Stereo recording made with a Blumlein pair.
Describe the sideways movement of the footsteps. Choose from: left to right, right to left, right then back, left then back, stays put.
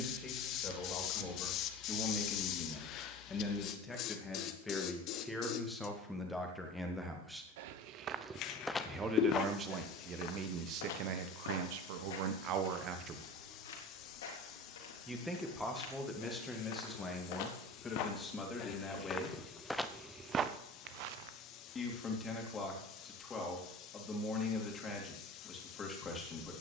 left then back.